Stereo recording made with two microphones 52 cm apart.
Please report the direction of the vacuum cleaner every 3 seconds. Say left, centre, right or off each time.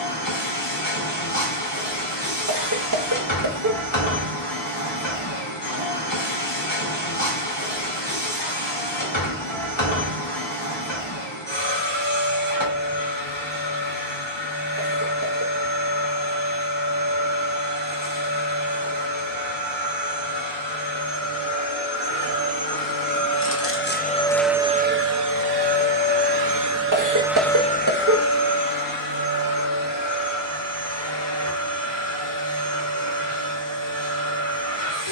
left, left, left, left, left, left, left, left, right, left, left, left.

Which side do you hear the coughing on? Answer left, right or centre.
right.